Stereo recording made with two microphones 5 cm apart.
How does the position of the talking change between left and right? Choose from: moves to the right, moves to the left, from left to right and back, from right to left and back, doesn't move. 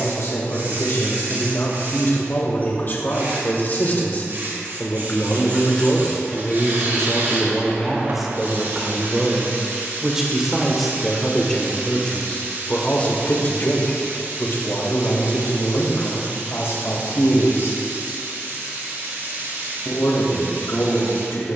from left to right and back.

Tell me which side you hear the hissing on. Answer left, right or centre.
right.